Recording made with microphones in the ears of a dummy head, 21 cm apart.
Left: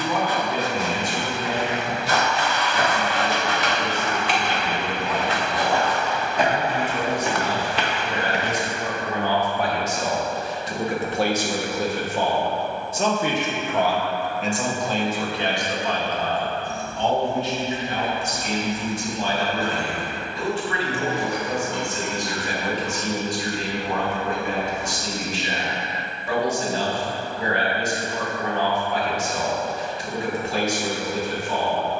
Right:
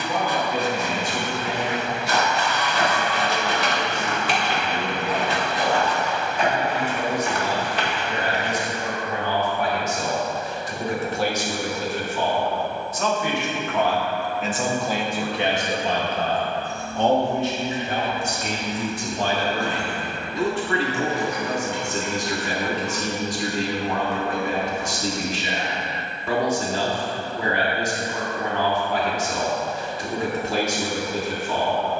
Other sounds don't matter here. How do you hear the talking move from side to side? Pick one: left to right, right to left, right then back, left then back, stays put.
left to right.